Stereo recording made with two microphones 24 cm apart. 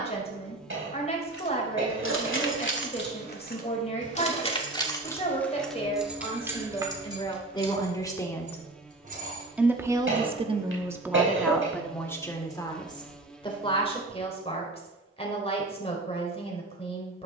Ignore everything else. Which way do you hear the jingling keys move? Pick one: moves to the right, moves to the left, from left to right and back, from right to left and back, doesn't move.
moves to the right.